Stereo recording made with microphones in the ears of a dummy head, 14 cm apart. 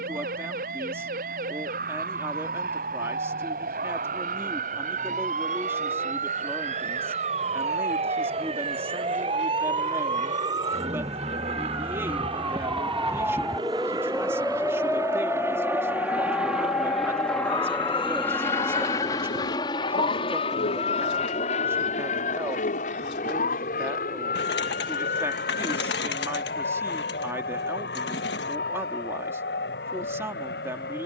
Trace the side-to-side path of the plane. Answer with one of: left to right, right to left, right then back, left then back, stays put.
right to left.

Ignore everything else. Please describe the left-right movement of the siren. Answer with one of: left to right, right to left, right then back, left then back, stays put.
right to left.